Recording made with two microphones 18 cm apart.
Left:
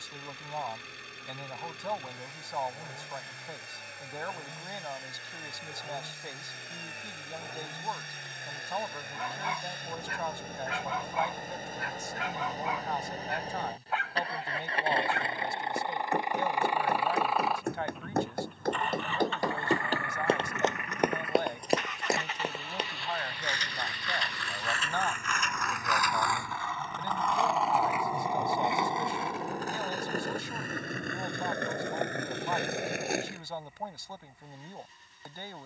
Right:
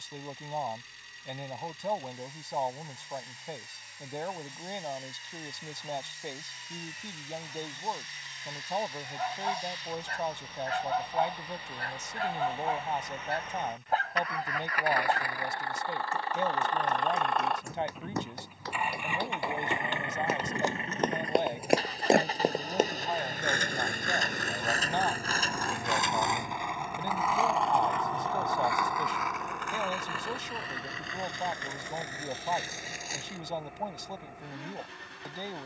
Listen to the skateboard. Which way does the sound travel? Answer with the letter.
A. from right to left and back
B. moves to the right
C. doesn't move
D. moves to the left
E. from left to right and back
D.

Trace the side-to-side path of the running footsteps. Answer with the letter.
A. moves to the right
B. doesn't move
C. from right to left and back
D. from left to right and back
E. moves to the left
A.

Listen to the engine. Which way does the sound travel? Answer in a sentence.
You can hear the engine move to the right.